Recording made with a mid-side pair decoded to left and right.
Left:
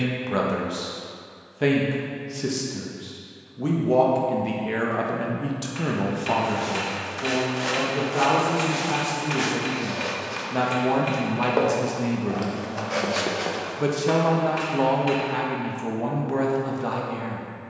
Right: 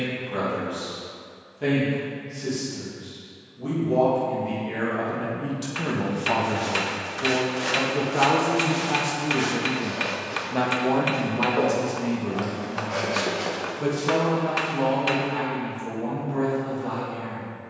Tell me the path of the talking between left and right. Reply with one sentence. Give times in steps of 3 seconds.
You can hear the talking on the left from 0 s, in the centre from 6 s and on the left from 12 s.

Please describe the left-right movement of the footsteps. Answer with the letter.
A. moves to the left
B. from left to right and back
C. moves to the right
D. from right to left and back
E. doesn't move
D.